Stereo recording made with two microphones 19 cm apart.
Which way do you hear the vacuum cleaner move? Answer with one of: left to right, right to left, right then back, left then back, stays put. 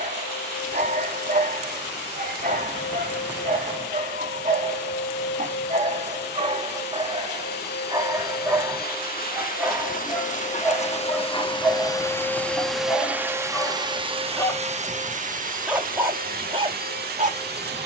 left to right.